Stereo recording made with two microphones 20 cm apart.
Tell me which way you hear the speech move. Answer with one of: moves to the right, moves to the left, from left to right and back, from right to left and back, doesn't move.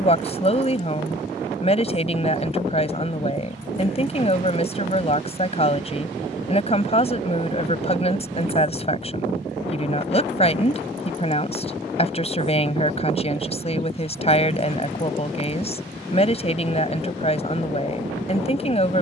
doesn't move.